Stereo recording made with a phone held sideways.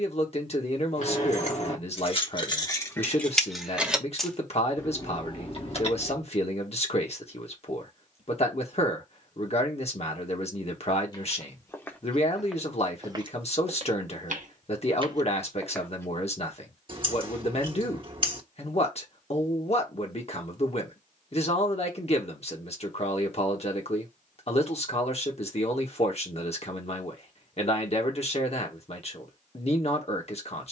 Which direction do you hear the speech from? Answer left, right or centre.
left.